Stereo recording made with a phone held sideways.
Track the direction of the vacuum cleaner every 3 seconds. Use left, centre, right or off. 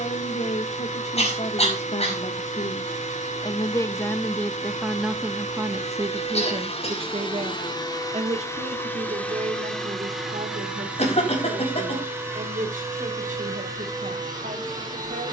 left, left, left, centre, right.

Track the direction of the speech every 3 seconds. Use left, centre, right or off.
left, centre, right, right, right.